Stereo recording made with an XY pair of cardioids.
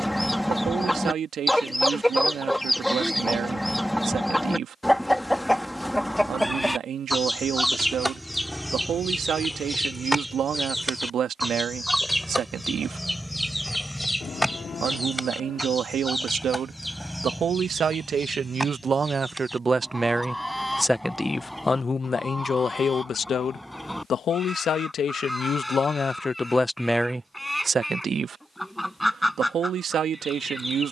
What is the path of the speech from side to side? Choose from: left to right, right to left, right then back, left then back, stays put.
left then back.